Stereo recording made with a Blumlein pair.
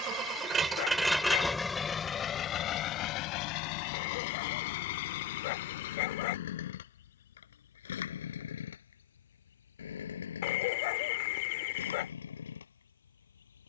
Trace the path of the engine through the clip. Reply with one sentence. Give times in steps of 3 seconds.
You can hear the engine in the centre from 0 s and on the left from 3 s.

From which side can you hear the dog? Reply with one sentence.
In this clip you hear the dog on the left.